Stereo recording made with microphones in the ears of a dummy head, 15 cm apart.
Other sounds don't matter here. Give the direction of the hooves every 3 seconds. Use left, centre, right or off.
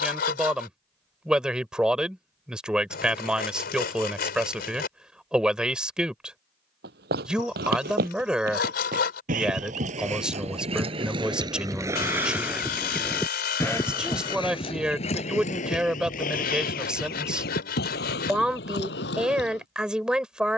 off, off, right, right, centre, left, left.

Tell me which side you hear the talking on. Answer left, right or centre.
centre.